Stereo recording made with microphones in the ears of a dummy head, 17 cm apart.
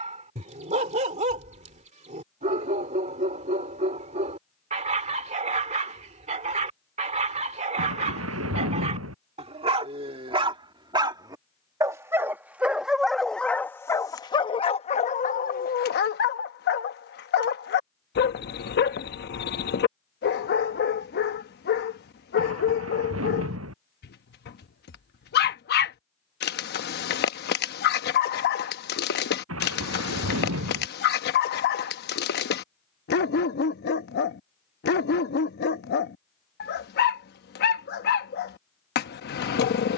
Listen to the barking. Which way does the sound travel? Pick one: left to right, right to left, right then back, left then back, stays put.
right to left.